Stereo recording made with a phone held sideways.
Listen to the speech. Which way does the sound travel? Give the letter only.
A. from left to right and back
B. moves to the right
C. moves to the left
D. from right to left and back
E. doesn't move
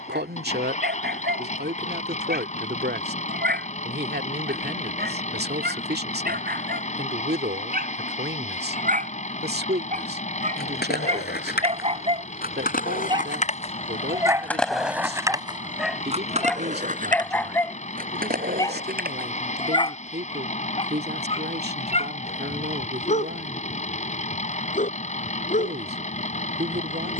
E.